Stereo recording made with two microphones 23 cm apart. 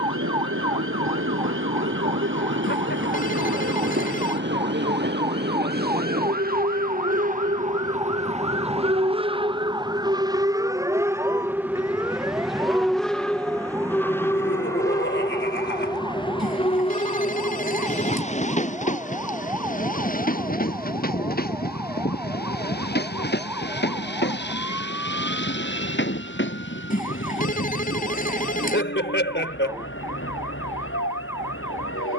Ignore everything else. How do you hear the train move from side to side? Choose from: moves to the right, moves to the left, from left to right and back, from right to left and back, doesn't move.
moves to the left.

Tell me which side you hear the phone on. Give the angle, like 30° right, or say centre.
30° left.